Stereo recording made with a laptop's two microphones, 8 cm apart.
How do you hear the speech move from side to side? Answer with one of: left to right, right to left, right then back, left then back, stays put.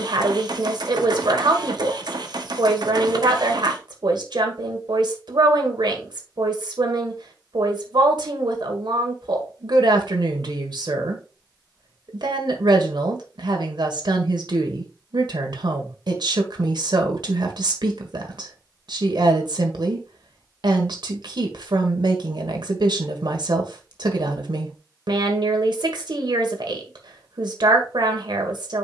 stays put.